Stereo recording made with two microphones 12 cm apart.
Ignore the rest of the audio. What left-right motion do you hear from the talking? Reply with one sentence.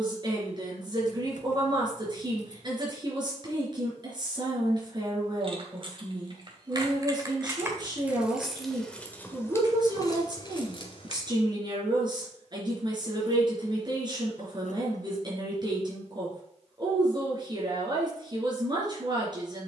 You can hear the talking stay in one place.